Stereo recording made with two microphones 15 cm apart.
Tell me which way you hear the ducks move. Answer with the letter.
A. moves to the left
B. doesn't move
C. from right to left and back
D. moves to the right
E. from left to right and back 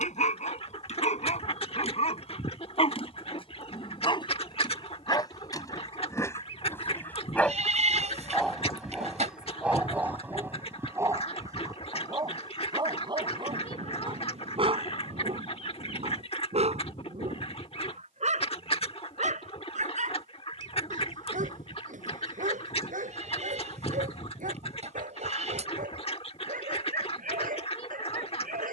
B.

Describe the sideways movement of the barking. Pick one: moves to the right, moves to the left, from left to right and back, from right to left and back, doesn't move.
moves to the right.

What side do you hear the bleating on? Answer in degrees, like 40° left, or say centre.
50° right.